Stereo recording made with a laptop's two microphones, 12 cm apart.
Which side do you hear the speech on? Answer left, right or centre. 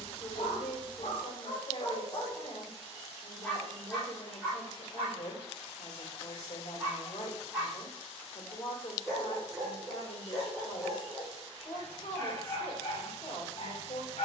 left.